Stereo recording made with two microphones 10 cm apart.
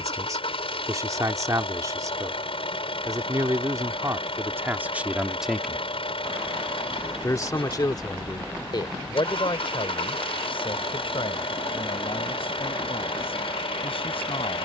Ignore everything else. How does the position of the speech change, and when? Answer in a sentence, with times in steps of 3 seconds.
You can hear the speech on the right from 0 s and on the left from 6 s.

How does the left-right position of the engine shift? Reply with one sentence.
In this clip you hear the engine stay in one place.